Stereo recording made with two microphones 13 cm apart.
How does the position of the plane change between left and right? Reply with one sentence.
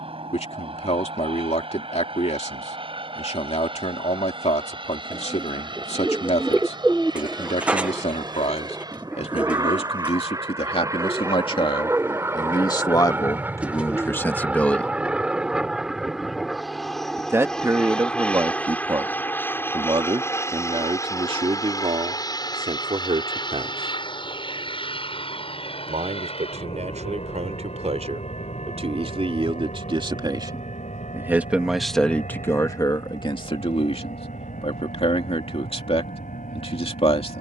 You can hear the plane go from the right side to the left.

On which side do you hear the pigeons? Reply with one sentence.
In this clip you hear the pigeons in the centre.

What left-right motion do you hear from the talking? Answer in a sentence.
In this clip you hear the talking move from left to right and back again.